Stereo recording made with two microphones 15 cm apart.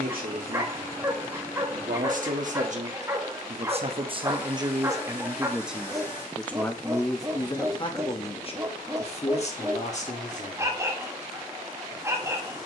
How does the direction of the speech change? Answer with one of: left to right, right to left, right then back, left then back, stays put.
right to left.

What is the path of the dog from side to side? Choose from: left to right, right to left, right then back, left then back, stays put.
stays put.